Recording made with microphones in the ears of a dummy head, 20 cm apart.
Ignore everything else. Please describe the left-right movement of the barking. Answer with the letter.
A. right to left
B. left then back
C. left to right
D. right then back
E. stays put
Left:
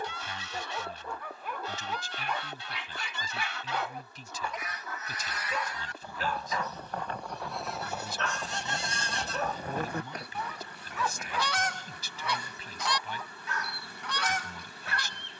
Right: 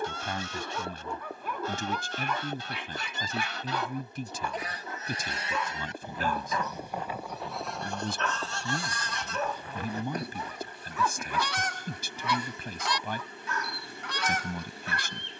E.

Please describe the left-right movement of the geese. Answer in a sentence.
You can hear the geese travel towards the left.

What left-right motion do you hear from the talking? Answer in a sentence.
In this clip you hear the talking stay put.